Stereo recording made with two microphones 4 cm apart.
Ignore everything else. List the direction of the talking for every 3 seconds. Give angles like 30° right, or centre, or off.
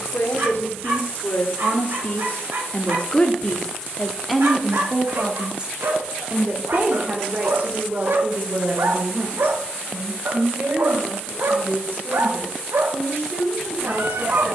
50° left, centre, 40° right, 60° right, 60° right.